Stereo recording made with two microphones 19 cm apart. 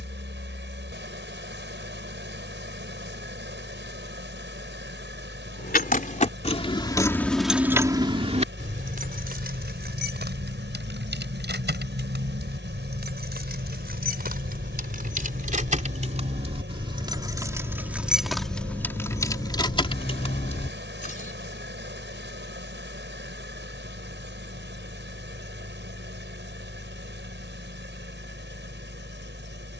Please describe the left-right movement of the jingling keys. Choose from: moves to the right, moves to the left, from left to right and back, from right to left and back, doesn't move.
from left to right and back.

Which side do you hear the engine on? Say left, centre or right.
right.